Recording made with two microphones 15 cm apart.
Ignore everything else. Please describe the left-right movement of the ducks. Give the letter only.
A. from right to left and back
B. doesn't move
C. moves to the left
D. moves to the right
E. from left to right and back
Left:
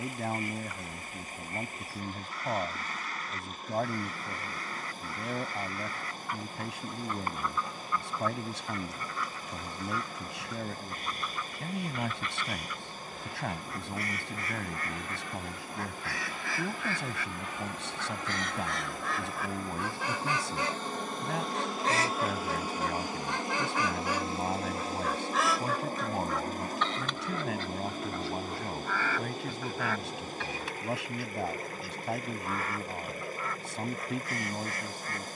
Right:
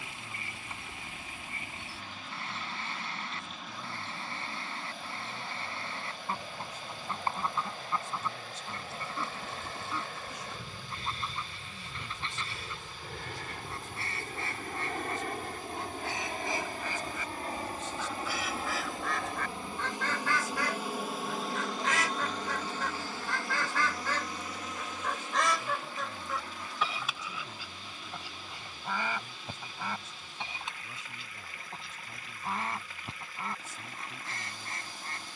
A.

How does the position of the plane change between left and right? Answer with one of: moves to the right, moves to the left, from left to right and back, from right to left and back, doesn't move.
moves to the left.